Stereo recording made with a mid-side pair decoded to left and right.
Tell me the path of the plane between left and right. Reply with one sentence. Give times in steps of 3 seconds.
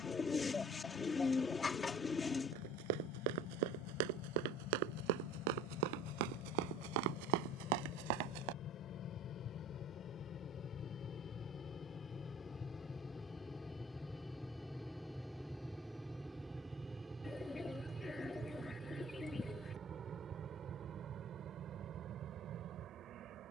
In this clip you hear the plane on the left from 0 s, in the centre from 12 s and on the right from 18 s.